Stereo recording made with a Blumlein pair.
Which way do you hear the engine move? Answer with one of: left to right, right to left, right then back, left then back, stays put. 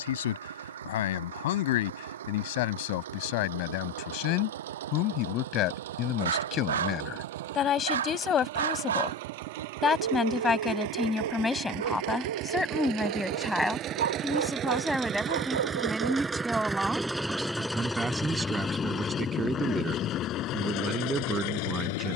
right to left.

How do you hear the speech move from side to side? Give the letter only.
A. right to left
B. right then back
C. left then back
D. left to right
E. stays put
D.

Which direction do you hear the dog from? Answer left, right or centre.
right.